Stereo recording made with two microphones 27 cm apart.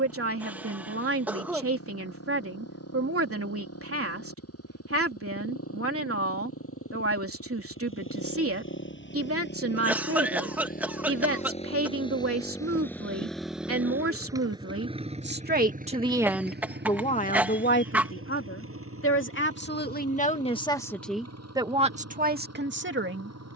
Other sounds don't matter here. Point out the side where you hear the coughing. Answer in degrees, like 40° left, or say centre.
10° right.